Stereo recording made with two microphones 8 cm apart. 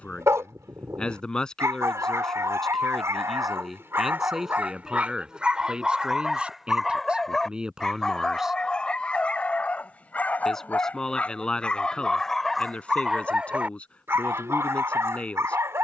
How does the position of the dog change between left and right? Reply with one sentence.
In this clip you hear the dog go left and come back.